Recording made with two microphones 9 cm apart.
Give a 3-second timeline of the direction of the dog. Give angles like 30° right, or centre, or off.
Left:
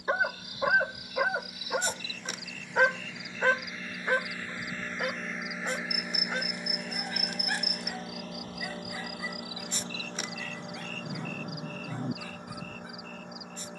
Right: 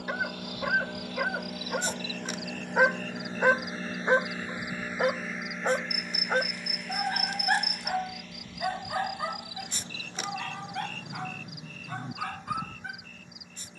10° left, 30° right, 50° right, 60° right, 60° right.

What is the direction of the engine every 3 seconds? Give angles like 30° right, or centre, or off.
60° right, 20° right, 30° left, 50° left, 60° left.